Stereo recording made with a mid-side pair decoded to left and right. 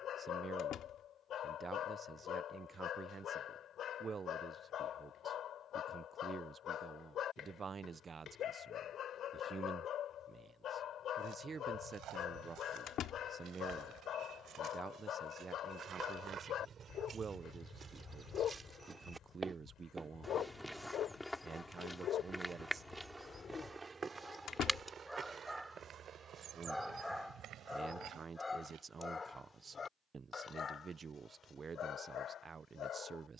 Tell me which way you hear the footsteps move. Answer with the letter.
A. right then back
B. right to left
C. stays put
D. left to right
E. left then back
E.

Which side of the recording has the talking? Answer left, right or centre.
right.